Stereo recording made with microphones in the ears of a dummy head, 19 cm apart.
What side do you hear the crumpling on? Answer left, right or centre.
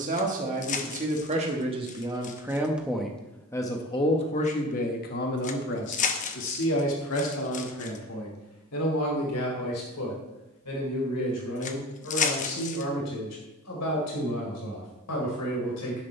left.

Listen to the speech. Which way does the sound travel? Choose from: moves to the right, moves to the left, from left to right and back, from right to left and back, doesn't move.
moves to the left.